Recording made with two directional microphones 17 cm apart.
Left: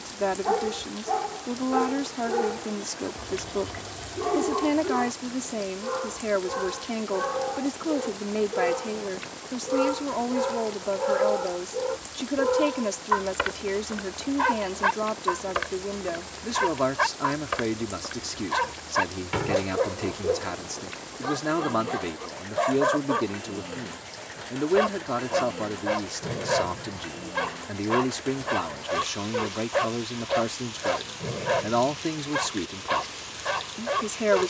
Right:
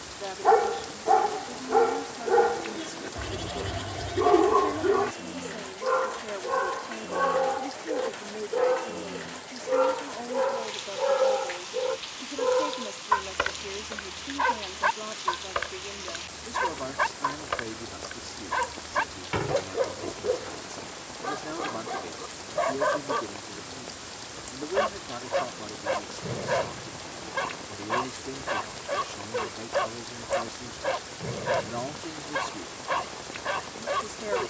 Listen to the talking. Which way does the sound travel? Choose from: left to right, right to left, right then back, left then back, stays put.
stays put.